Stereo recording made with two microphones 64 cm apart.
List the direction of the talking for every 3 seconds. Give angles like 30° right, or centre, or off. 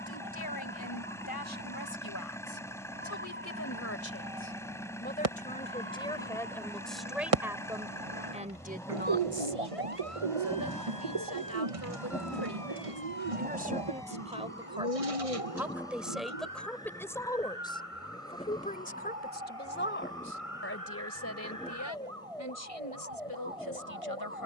30° left, 20° left, centre, 20° right, 10° right, centre, 20° left, 30° left.